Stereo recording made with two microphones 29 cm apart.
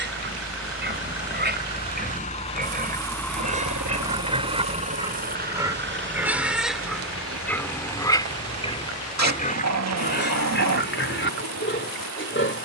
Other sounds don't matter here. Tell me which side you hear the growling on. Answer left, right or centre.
right.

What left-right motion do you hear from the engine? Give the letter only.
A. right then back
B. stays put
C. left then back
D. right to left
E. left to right
E.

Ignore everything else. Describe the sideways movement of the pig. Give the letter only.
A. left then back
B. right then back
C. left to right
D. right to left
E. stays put
D.